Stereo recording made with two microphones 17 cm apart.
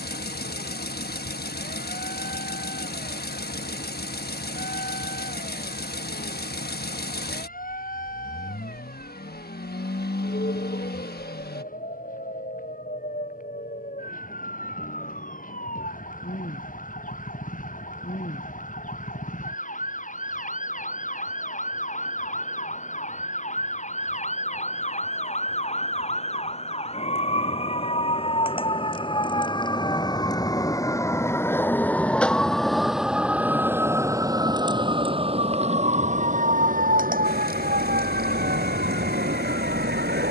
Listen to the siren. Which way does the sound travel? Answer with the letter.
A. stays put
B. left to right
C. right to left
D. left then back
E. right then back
B.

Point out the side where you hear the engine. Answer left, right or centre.
left.